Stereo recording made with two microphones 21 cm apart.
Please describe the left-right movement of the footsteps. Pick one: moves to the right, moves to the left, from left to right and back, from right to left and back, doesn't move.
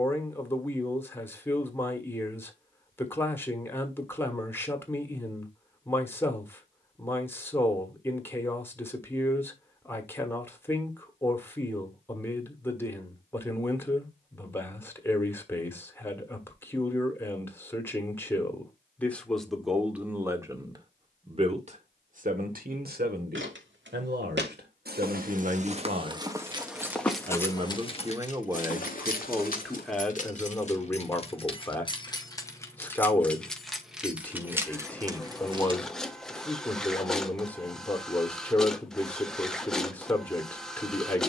moves to the left.